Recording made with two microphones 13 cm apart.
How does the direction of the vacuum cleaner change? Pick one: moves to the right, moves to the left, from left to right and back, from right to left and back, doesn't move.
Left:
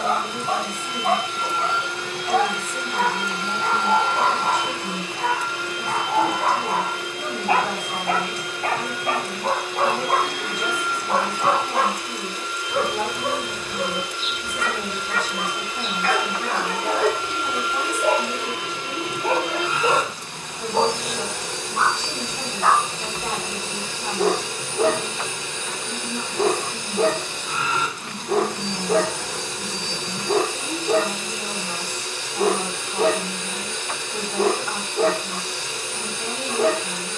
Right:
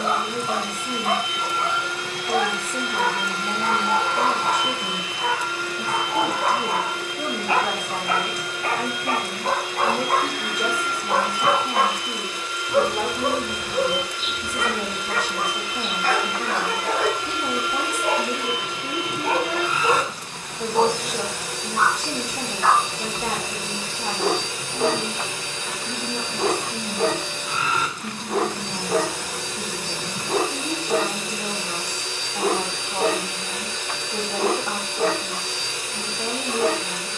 doesn't move.